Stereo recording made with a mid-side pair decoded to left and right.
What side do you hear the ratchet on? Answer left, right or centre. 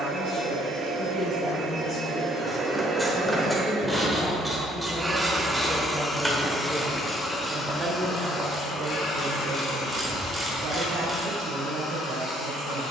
centre.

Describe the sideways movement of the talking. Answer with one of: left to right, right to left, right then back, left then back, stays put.
left to right.